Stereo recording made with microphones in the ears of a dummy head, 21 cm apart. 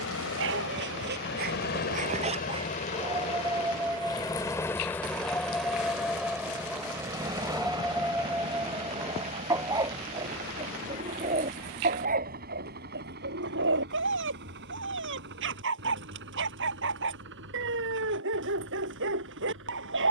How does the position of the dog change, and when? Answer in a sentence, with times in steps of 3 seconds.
In this clip you hear the dog on the right from 0 s, in the centre from 3 s and on the right from 9 s.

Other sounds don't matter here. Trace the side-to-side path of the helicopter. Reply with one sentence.
In this clip you hear the helicopter go from the left side to the right.